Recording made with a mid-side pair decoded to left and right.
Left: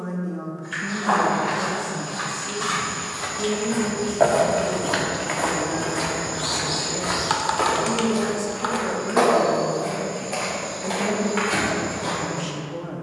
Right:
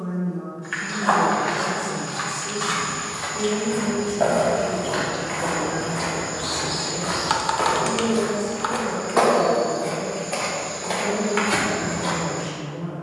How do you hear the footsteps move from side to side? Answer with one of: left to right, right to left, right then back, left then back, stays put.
left then back.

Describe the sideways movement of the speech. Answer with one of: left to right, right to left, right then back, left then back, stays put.
right then back.